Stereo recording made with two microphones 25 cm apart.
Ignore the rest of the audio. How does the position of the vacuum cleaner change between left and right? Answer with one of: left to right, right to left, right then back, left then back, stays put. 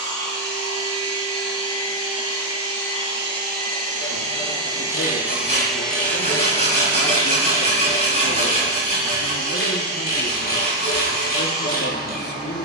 right to left.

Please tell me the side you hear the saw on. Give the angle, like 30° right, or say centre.
30° right.